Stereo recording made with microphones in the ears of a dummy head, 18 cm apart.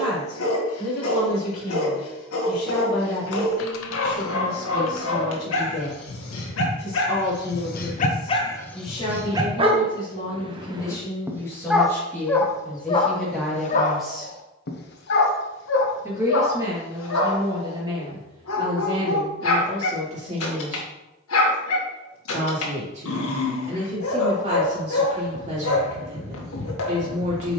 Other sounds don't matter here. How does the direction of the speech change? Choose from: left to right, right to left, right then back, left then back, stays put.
left to right.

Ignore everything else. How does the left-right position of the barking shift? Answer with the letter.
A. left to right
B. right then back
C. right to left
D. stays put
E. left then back
B.